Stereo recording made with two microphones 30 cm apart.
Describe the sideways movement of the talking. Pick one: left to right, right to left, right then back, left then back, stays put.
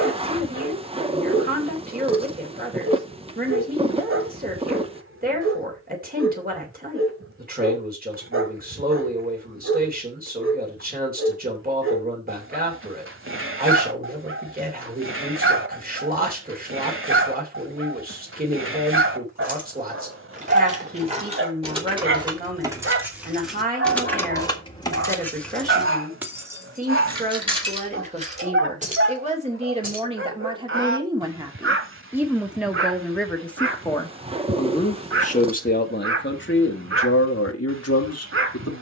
right to left.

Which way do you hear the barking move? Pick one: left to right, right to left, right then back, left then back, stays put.
stays put.